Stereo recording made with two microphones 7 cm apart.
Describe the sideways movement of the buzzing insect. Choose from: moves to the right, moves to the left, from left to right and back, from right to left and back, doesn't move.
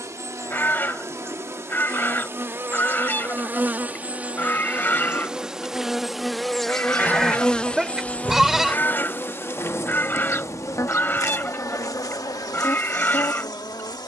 moves to the left.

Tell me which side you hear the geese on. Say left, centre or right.
left.